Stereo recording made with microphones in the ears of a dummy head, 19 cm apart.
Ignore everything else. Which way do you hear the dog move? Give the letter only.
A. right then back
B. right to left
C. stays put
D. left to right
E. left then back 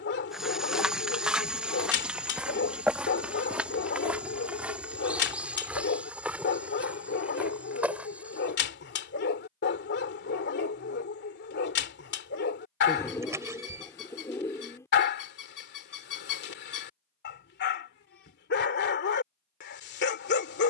C.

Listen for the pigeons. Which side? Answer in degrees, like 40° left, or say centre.
10° left.